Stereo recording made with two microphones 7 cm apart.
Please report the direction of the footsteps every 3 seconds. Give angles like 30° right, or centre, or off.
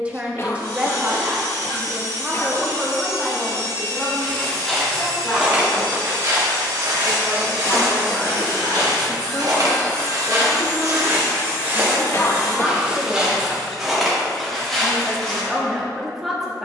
off, 10° right, 60° right, 40° right, centre, 10° left.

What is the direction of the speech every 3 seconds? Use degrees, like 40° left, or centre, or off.
10° right, 20° left, 30° left, 20° left, centre, centre.